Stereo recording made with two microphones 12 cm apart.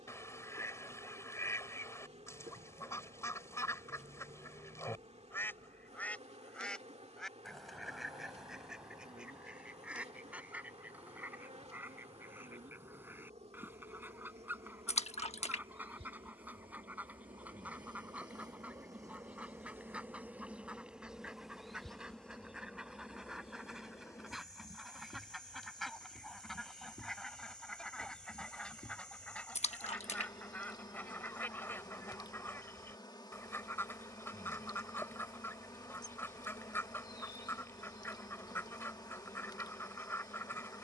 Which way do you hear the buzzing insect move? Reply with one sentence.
In this clip you hear the buzzing insect move to the left.